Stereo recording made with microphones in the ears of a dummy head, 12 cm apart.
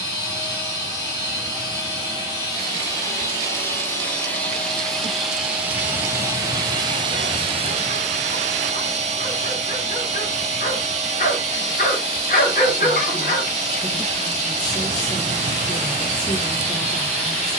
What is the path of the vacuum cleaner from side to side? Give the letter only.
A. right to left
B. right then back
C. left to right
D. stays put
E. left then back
C.